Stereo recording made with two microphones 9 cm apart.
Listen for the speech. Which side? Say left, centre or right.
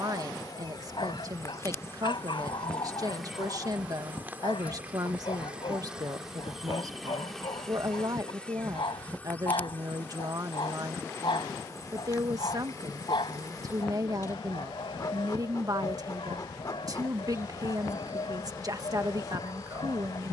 right.